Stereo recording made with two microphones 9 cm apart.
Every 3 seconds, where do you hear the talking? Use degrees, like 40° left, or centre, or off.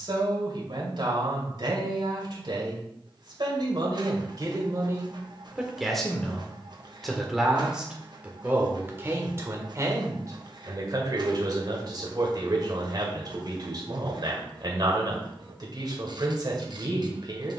60° right, 40° right, 10° right, 40° right, 50° right, 50° right.